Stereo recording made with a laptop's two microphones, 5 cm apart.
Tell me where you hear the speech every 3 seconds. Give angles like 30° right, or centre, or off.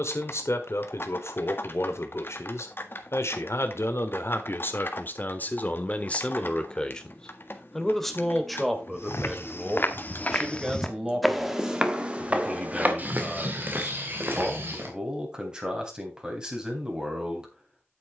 70° left, 50° left, 10° left, 10° right, 20° right, 20° right.